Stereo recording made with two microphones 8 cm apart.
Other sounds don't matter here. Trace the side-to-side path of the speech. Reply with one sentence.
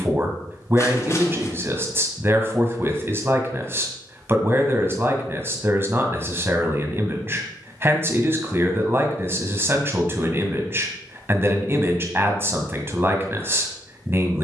You can hear the speech stay in one place.